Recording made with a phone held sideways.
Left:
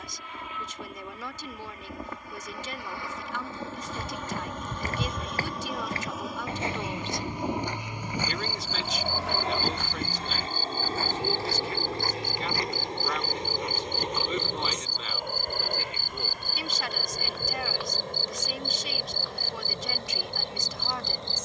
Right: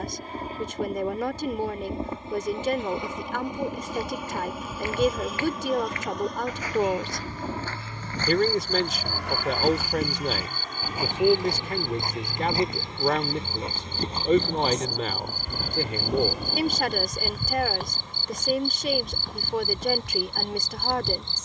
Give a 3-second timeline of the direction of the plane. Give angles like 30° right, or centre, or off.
30° right, 10° right, 10° left, 30° left, 40° left, 50° left, 50° left.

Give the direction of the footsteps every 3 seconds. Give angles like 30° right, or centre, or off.
off, 40° left, 20° left, 10° right, 30° right, 40° right, 50° right.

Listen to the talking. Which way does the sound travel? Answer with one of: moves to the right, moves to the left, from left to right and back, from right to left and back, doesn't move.
doesn't move.